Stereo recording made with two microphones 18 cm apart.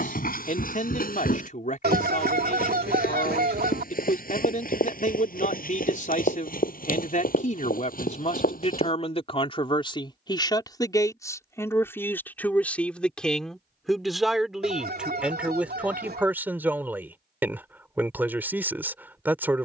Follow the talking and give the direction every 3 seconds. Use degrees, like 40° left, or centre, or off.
50° left, 50° left, 40° left, 20° left, centre, 10° right, 10° right.